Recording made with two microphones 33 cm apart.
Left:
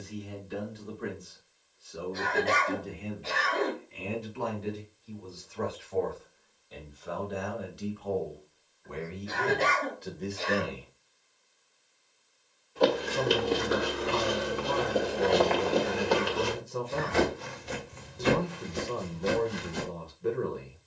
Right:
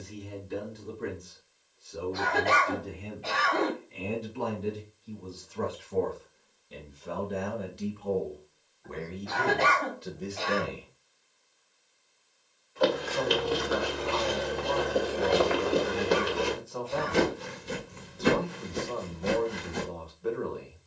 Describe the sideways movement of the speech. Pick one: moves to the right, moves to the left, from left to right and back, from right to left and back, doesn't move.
moves to the left.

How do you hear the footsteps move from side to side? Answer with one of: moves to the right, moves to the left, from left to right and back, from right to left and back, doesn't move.
moves to the right.